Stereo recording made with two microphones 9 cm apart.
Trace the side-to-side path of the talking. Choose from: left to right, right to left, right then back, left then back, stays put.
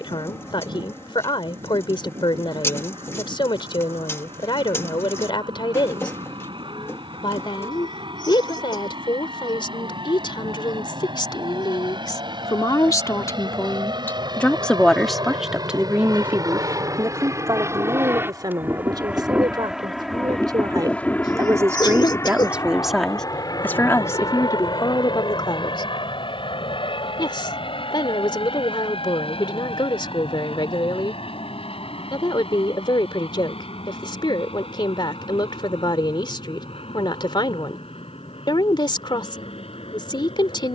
right then back.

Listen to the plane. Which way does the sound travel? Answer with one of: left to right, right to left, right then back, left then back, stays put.
right to left.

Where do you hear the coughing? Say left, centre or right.
left.